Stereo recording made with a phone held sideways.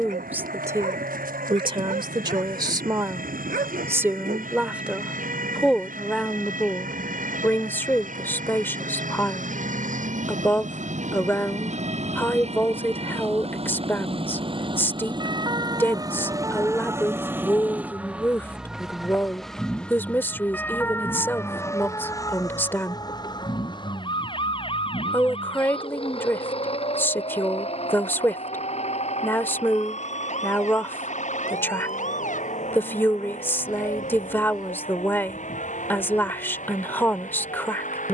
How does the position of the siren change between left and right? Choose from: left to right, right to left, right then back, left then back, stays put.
right to left.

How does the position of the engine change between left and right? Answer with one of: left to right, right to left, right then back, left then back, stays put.
right to left.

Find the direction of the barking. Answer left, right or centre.
right.